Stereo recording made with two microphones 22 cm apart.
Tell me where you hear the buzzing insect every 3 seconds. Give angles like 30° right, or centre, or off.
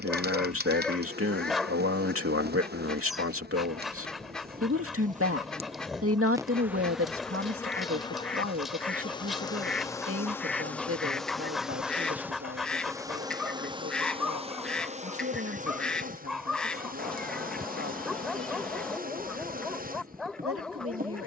40° right, 40° right, 10° left, 10° left, 20° right, 40° right, 40° right.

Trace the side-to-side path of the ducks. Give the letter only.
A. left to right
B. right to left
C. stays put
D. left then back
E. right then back
C.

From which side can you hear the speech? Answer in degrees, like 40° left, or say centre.
70° right.